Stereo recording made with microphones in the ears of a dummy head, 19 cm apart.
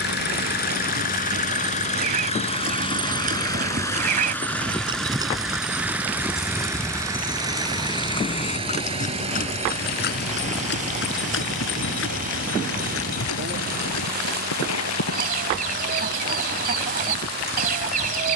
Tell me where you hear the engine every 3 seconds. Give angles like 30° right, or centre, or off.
40° left, 10° left, 20° right, 30° right, 40° right, 50° right.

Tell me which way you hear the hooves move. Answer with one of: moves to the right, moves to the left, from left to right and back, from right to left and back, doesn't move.
moves to the left.